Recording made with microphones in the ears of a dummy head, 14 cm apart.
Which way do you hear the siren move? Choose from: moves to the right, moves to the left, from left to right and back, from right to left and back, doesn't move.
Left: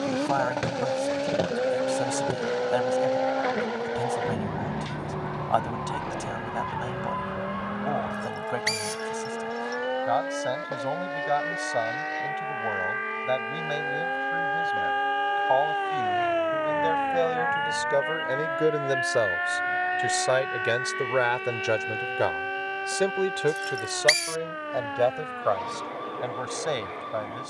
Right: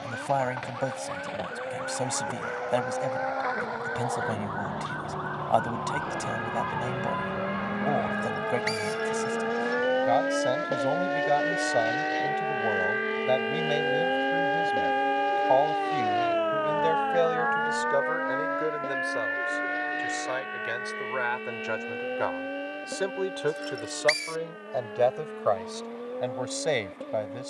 moves to the left.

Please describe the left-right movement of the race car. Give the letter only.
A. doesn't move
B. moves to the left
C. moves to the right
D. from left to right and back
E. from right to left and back
C.